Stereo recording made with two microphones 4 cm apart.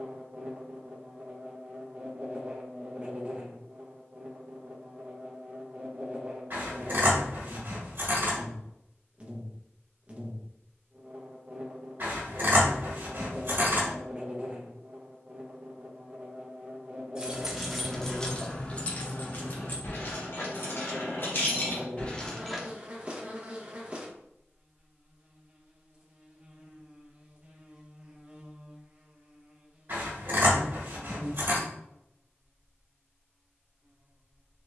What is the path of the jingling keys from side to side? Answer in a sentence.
In this clip you hear the jingling keys go left and come back.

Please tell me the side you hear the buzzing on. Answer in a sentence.
You can hear the buzzing on the right.